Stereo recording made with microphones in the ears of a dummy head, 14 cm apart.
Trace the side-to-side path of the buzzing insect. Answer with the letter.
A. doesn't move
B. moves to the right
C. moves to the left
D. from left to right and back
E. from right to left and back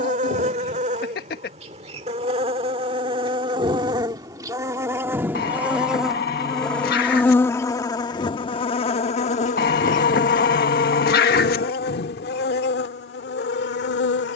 C.